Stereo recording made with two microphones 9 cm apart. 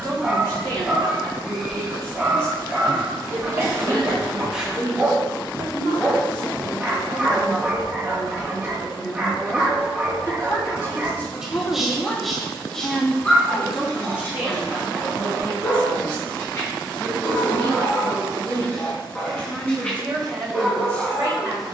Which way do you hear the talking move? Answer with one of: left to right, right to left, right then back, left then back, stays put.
left then back.